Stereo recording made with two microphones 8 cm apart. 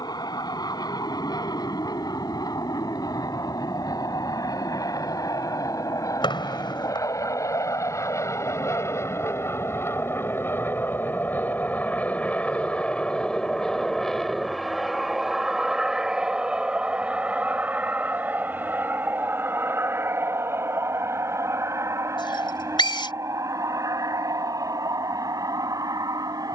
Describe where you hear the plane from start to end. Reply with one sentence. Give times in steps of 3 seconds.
You can hear the plane on the left from 0 s, in the centre from 12 s and on the right from 18 s.